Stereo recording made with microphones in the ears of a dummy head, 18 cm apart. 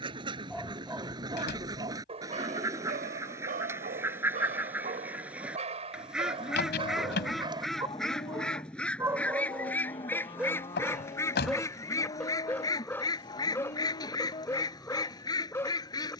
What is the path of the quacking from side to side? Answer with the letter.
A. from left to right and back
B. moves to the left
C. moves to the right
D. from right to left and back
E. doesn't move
B.